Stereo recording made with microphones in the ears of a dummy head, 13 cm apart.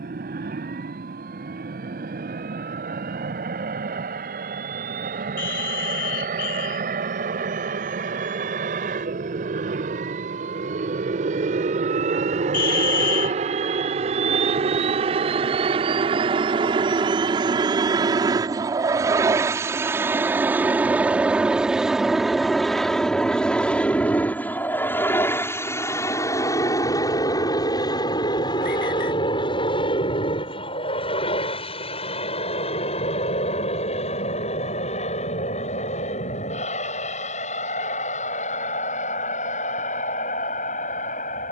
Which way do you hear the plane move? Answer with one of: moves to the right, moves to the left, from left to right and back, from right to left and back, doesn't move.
moves to the left.